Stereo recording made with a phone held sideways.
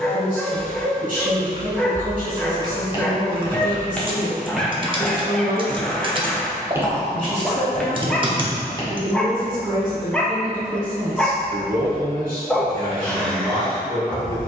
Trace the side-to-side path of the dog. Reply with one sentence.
You can hear the dog stay put.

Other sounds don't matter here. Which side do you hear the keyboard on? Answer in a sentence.
In this clip you hear the keyboard on the right.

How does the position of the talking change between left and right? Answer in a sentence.
You can hear the talking stay in one place.